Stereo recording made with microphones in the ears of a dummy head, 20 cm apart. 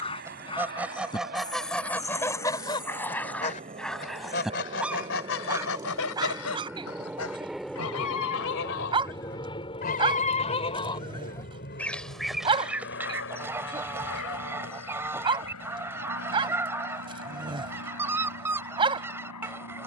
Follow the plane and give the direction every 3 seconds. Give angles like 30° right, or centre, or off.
40° right, 30° right, centre, 30° left, 50° left, 70° left, 70° left.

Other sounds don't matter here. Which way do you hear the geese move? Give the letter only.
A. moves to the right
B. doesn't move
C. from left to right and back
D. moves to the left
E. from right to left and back
E.